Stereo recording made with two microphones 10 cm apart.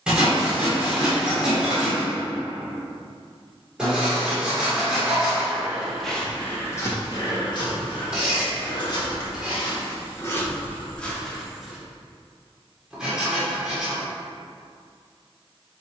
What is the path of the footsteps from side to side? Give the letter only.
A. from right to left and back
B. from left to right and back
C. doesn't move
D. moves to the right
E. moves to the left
A.